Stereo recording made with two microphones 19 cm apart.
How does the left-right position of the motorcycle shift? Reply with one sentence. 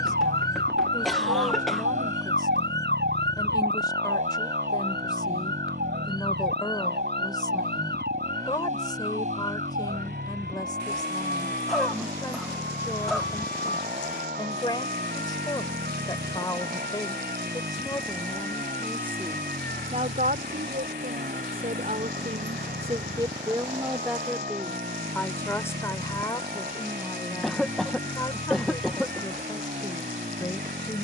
You can hear the motorcycle stay put.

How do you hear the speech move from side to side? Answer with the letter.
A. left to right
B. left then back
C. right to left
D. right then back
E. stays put
D.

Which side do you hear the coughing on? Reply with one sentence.
In this clip you hear the coughing in the centre.